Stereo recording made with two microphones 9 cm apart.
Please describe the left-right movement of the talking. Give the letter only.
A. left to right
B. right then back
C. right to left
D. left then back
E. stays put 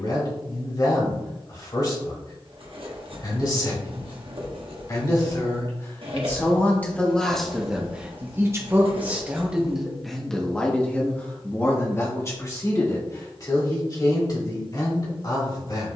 B.